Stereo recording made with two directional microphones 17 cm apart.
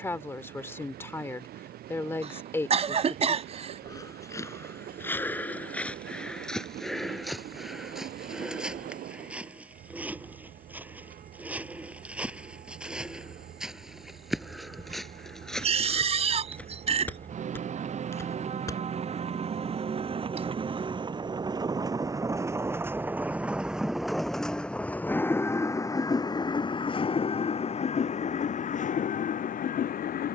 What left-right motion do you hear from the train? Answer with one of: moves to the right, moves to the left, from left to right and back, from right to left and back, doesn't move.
moves to the left.